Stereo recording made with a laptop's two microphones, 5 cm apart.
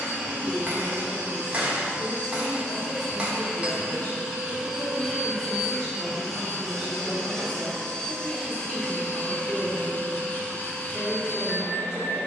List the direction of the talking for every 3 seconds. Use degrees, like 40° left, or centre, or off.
60° left, 30° left, centre, 10° right.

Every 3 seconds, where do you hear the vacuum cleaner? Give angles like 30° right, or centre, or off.
20° right, 10° right, 10° left, 30° left.